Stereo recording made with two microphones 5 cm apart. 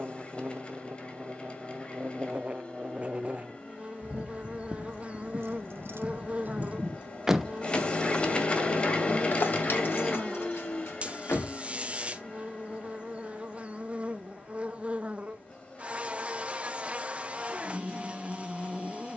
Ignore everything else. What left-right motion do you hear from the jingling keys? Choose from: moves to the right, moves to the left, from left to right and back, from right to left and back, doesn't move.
moves to the left.